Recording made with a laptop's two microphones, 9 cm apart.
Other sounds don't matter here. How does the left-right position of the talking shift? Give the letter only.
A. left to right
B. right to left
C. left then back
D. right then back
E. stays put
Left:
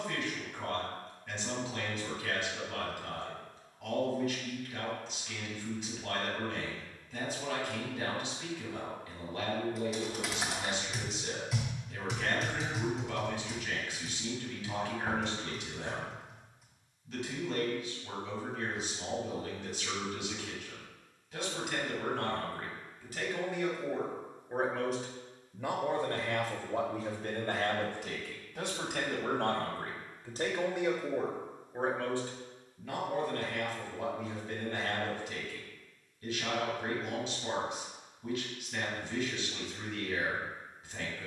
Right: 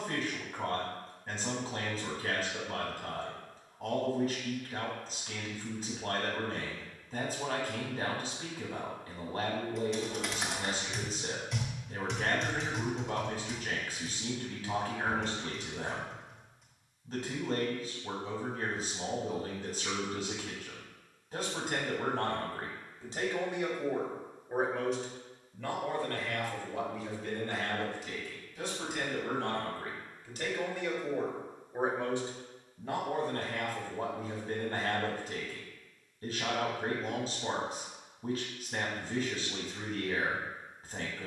C.